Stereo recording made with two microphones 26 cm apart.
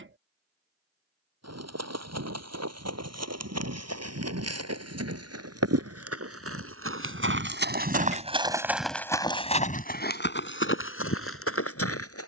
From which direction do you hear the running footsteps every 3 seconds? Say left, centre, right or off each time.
right, right, right, left.